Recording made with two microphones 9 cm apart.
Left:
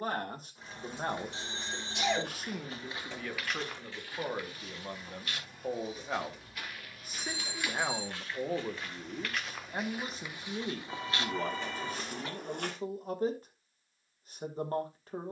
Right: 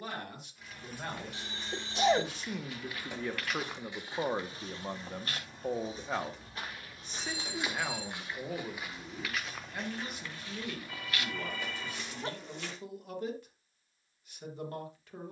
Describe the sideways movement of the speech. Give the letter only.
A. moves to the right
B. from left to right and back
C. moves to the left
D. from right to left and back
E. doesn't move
B.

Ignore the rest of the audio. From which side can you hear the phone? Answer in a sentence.
You can hear the phone on the left.